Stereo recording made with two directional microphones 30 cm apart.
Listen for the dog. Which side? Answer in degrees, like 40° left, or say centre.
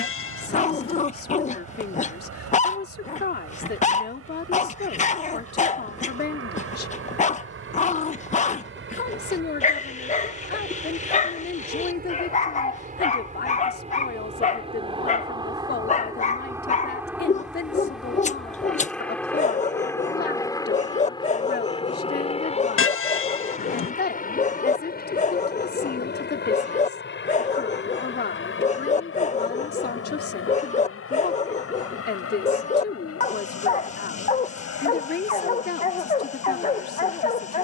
20° left.